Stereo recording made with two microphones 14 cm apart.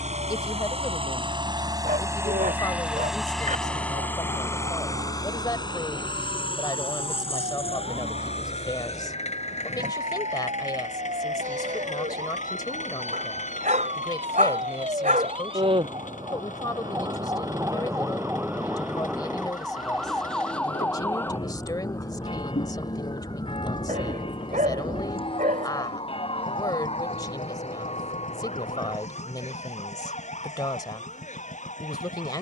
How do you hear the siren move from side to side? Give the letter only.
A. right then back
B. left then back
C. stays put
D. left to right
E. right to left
E.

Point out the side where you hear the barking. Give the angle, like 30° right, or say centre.
70° right.